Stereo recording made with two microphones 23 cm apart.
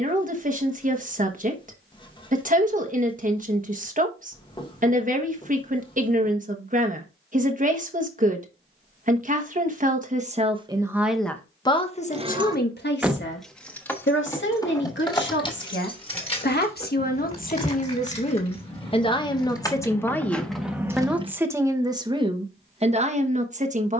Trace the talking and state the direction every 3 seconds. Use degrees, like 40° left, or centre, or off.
40° right, 40° right, 40° right, 20° right, 50° left, 50° left, 20° left, 20° right.